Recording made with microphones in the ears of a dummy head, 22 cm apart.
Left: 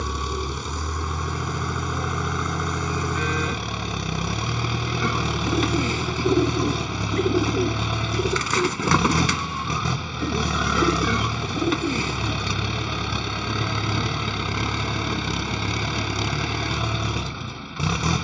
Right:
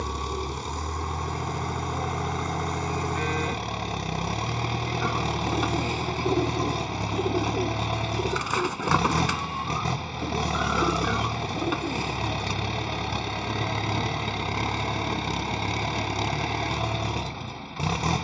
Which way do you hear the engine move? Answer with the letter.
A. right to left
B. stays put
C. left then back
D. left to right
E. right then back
B.